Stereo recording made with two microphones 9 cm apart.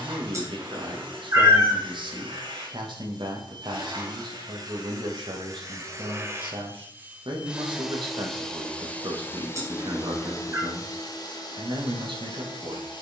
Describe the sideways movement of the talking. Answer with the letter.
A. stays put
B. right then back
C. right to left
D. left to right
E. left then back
A.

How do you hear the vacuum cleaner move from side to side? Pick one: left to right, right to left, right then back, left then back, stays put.
right to left.